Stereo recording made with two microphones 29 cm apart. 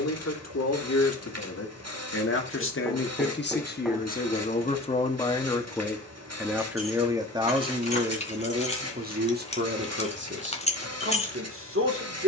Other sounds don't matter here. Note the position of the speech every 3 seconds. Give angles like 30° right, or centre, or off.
60° left, 30° left, 20° right, 40° right.